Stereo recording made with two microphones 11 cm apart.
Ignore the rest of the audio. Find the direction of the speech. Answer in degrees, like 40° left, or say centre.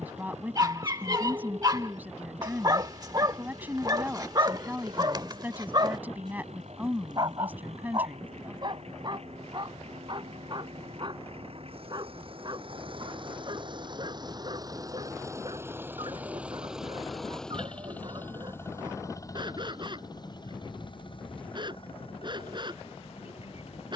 20° right.